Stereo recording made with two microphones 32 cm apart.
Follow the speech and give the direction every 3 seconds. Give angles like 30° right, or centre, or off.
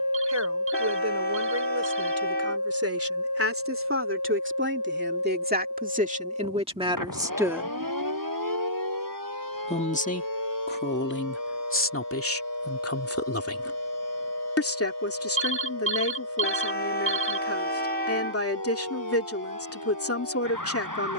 50° right, 40° right, 10° right, 30° left, 50° left, 50° left, 50° left.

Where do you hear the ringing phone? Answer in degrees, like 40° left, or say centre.
40° right.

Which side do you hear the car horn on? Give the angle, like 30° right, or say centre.
30° left.